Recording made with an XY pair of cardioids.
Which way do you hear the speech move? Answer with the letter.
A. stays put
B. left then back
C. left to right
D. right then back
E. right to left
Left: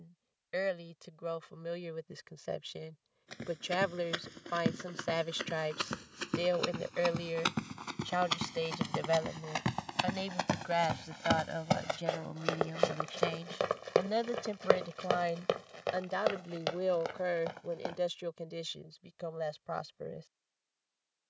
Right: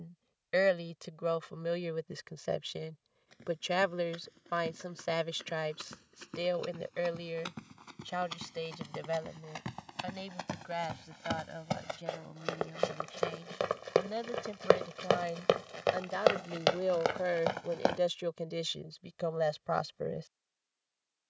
B.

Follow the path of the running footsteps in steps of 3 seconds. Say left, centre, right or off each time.
off, left, left, left, centre, right, off.